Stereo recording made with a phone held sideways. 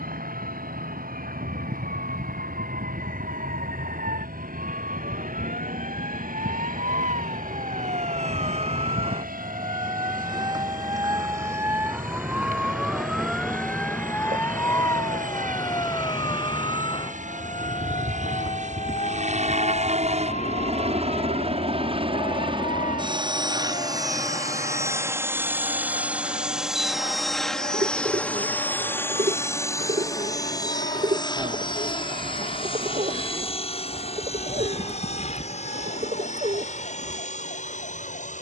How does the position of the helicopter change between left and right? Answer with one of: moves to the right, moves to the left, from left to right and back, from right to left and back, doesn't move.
moves to the left.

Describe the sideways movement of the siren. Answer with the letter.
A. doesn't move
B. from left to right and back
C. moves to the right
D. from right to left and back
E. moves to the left
E.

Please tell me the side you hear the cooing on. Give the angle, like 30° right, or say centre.
50° right.